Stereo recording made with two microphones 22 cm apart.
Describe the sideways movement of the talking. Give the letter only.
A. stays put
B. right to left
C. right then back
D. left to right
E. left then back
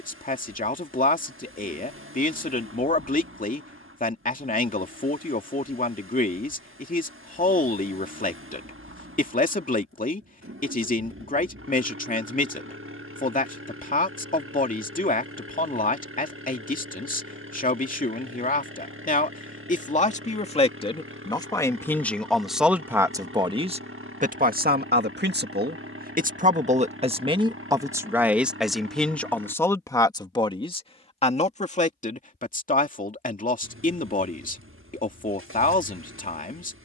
C.